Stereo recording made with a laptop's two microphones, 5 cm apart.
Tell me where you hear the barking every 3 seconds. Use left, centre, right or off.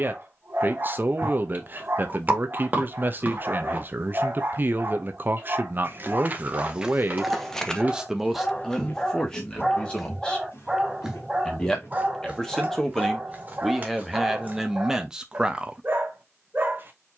right, right, centre, centre, right, right.